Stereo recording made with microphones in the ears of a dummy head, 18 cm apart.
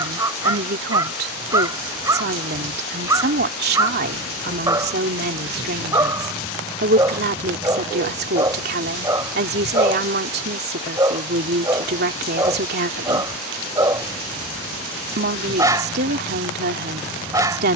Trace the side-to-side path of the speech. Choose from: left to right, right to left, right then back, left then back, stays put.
stays put.